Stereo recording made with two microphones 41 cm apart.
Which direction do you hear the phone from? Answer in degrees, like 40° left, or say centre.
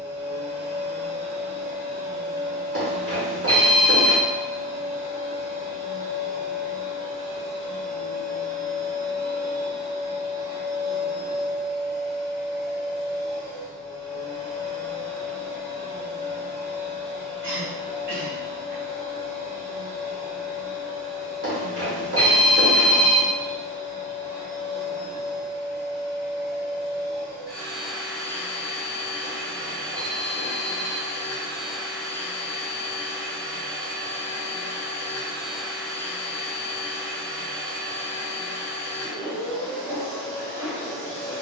30° right.